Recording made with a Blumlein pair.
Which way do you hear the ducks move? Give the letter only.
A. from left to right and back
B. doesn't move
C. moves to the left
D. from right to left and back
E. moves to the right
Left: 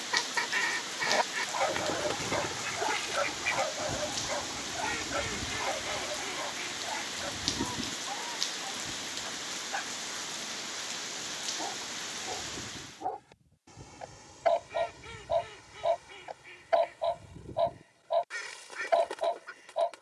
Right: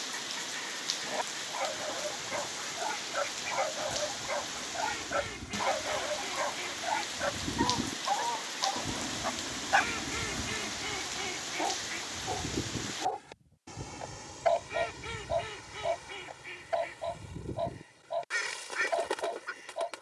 E.